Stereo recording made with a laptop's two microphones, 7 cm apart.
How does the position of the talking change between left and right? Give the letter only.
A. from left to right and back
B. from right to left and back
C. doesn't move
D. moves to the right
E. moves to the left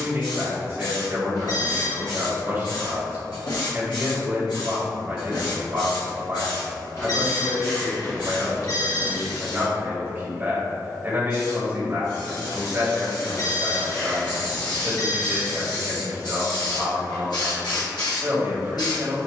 C.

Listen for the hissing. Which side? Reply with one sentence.
You can hear the hissing on the left.